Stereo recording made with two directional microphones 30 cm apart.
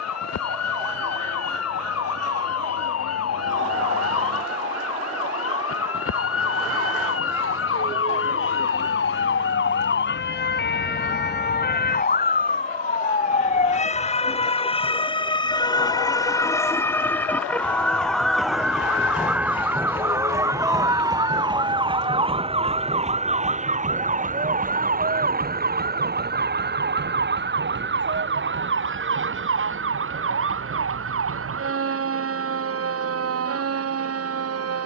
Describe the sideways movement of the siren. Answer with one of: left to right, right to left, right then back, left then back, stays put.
left to right.